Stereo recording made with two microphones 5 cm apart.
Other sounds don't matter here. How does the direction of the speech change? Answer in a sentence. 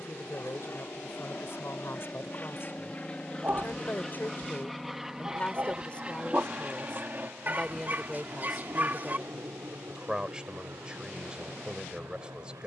You can hear the speech travel towards the right.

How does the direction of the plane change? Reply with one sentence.
In this clip you hear the plane move from left to right.